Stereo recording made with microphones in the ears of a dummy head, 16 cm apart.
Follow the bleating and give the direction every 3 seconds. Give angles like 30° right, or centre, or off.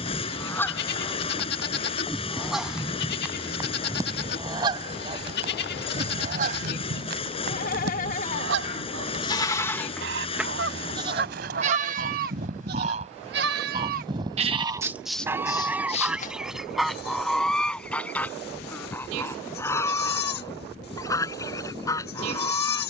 60° left, 60° left, 50° left, 10° right, 40° right, 40° left, 60° left, 60° left.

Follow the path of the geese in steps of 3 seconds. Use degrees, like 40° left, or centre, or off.
10° left, 20° right, 60° right, 60° right, 30° right, centre, 10° left, 20° left.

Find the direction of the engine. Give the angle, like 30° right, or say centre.
30° left.